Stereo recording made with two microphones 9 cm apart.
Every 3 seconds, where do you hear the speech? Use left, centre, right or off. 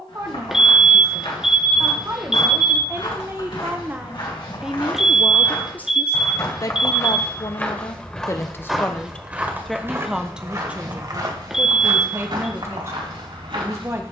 right, centre, left, centre, right.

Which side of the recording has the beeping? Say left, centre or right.
centre.